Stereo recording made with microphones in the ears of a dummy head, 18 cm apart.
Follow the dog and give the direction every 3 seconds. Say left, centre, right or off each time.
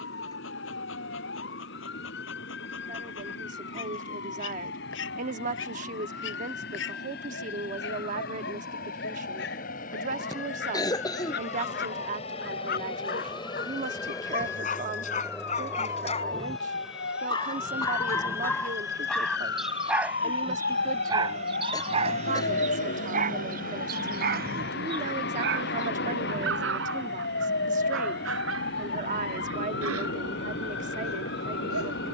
left, left, left, left, left, left, centre, right, right, right, right.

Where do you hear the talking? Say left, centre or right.
right.